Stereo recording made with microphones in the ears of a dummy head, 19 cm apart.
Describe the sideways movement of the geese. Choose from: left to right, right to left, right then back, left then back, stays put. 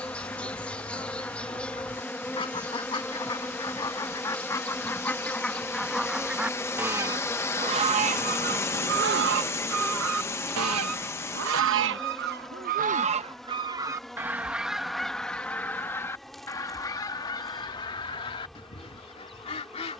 right then back.